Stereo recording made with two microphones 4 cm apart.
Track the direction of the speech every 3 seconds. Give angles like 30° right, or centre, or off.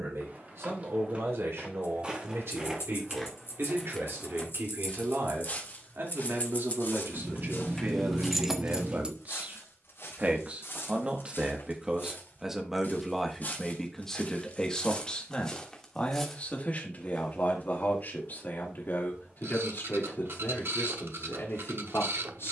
70° right, 70° right, 50° right, 30° right, centre, 30° left, 50° left, 60° left.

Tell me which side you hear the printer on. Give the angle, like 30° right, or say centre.
60° right.